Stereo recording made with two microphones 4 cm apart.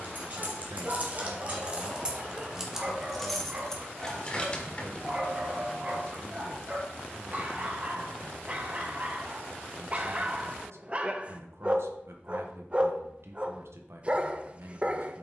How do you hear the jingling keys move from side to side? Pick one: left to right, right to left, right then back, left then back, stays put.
right to left.